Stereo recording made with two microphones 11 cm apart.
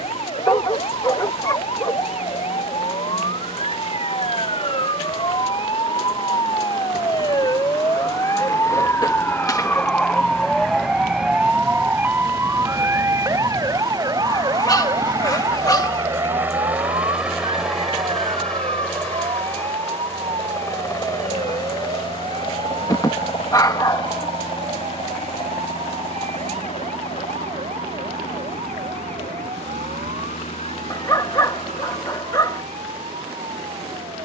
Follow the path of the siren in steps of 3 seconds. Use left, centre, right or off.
left, left, left, centre, right, right, right, right, right, right, right, right.